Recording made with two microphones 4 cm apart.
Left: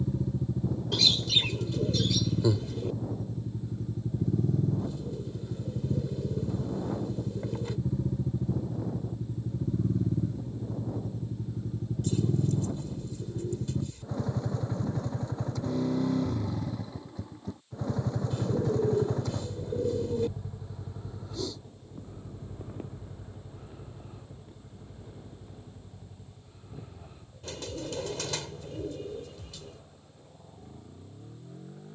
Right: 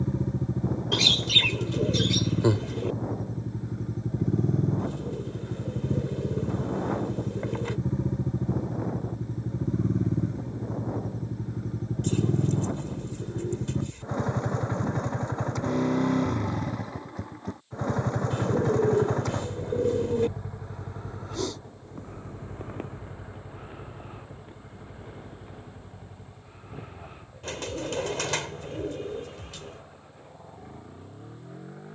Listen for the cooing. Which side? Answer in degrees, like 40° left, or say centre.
60° right.